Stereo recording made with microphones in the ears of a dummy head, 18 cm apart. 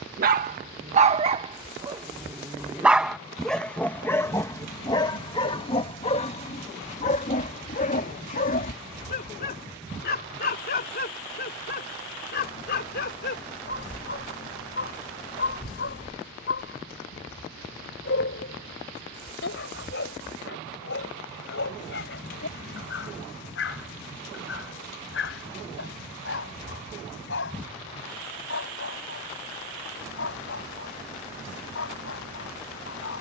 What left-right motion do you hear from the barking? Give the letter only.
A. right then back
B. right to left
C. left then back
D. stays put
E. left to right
B.